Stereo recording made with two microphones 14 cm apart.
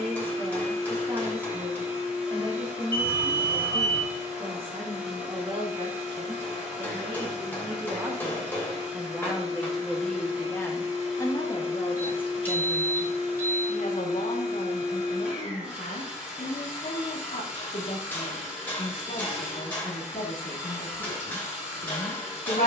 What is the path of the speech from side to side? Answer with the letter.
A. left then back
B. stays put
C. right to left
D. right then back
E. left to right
C.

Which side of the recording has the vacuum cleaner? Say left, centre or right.
centre.